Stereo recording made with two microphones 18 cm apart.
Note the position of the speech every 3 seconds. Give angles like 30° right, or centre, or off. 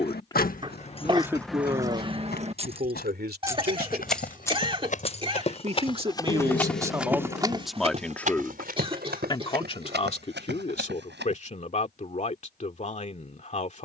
20° right, 50° right, 10° right, 40° left, 40° left.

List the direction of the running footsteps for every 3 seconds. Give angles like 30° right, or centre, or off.
60° left, 50° left, 20° right, 70° right, off.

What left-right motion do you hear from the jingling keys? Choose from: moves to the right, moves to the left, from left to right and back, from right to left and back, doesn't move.
from left to right and back.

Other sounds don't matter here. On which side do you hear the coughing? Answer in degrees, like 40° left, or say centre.
30° right.